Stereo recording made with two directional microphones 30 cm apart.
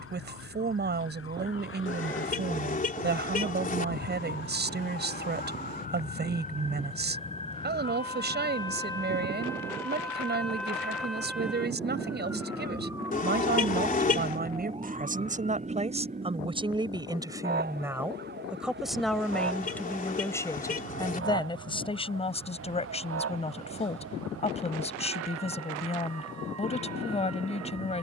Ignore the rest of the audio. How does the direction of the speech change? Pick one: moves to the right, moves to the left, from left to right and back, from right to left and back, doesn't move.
moves to the left.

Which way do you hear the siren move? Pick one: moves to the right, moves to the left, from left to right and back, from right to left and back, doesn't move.
moves to the right.